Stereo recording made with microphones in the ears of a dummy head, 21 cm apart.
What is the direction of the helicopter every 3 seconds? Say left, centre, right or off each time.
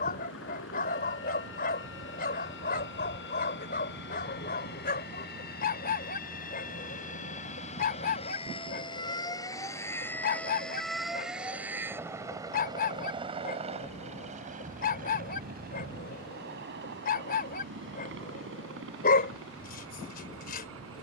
left, left, left, centre, right, right, right.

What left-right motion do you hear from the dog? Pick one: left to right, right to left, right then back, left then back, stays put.
stays put.